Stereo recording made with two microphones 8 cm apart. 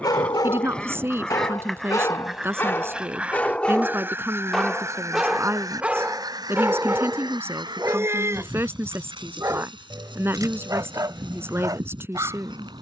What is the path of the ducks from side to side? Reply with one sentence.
In this clip you hear the ducks travel towards the right.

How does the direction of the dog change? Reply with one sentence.
You can hear the dog travel towards the right.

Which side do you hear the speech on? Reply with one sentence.
In this clip you hear the speech on the right.